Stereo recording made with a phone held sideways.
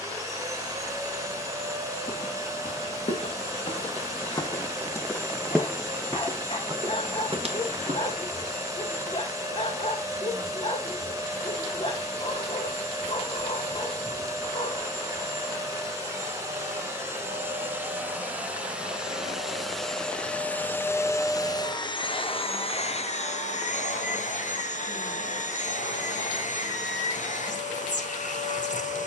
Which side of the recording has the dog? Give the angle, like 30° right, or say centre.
50° left.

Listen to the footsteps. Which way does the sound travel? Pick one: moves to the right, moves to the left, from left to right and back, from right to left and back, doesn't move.
moves to the right.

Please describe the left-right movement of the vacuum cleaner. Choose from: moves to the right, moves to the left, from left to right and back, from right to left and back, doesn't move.
moves to the left.